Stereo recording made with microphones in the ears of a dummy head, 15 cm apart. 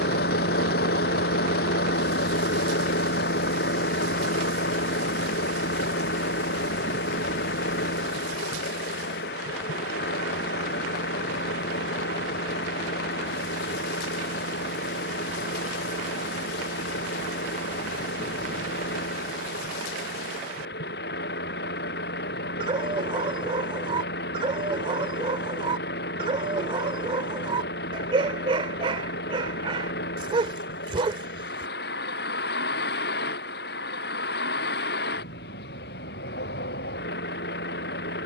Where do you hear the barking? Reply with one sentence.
In this clip you hear the barking on the right.